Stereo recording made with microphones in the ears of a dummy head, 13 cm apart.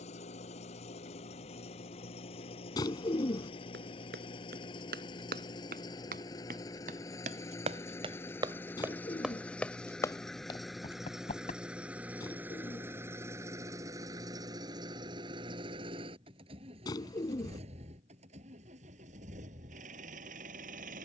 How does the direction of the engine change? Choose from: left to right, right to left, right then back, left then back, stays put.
left to right.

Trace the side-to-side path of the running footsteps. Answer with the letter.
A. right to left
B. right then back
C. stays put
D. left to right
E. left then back
A.